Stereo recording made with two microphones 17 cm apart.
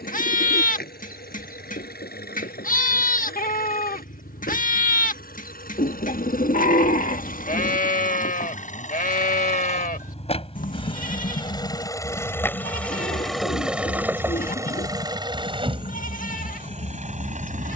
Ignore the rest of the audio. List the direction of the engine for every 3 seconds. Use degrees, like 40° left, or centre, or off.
70° left, 70° left, 60° left, 40° left, centre, 40° right.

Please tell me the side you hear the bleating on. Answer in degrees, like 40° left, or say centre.
60° left.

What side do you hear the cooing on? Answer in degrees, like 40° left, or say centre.
60° left.